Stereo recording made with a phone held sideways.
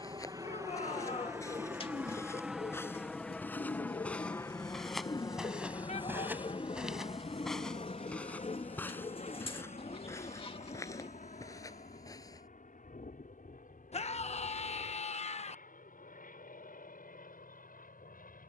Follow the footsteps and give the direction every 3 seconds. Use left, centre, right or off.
left, centre, centre, left, left, off.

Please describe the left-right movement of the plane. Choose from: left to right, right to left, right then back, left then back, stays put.
right to left.